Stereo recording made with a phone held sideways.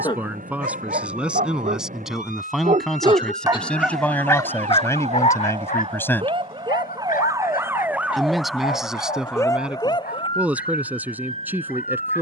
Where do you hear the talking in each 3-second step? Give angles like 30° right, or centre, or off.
10° right, 10° left, centre, 10° right.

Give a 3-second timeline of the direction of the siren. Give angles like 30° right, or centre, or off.
60° right, 50° right, 20° right, 30° left.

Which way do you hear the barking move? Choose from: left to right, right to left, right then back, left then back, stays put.
right to left.